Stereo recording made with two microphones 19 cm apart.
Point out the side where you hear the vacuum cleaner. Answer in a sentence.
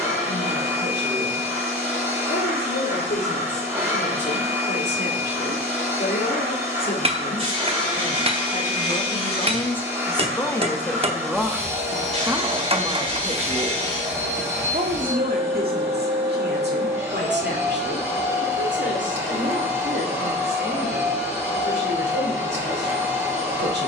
You can hear the vacuum cleaner in the centre.